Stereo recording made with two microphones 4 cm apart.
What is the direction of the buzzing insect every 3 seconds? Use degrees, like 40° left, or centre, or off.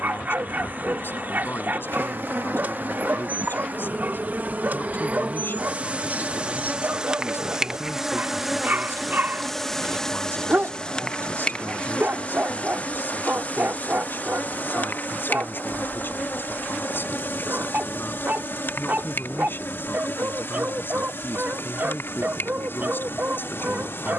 60° right, 40° right, 10° right, 20° left, 40° left, 50° left, 60° left, 70° left.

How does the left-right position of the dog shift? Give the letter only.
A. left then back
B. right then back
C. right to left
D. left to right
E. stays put
E.